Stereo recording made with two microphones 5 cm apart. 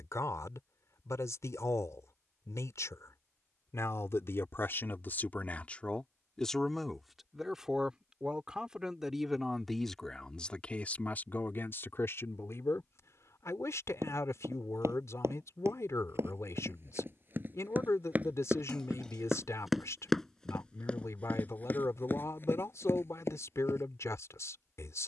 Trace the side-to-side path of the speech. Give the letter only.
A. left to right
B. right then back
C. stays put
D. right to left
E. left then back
B.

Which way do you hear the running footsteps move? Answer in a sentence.
You can hear the running footsteps move to the left.